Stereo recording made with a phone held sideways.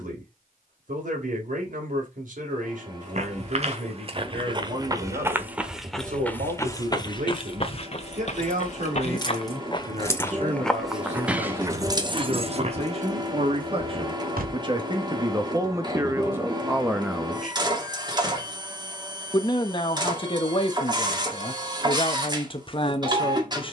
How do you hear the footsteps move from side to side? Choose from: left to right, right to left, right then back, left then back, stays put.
left then back.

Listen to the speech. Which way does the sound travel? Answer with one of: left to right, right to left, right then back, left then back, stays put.
right to left.